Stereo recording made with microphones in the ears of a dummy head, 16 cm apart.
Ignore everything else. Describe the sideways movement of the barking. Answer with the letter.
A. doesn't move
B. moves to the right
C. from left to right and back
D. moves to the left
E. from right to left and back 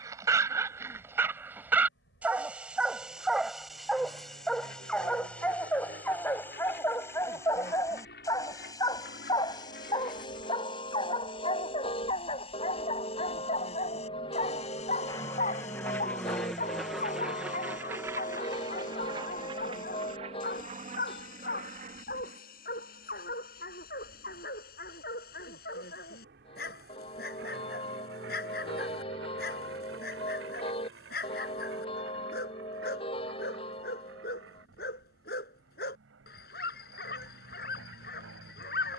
D.